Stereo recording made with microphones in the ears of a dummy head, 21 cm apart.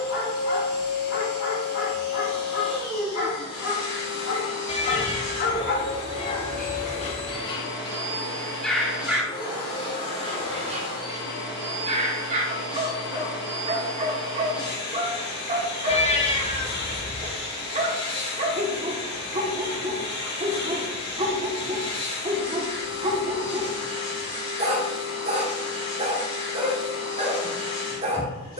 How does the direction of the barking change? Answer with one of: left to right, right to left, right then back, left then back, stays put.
left to right.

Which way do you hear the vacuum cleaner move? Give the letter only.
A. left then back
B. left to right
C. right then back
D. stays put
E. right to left
D.